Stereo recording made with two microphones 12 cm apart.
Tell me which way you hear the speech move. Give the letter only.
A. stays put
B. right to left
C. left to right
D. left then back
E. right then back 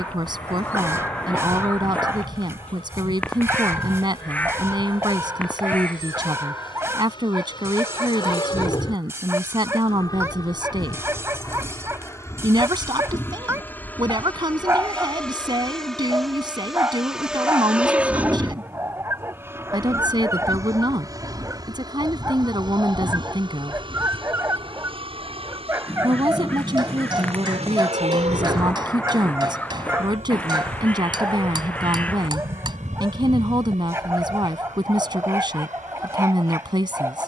A.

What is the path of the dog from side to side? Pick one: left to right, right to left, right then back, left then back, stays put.
stays put.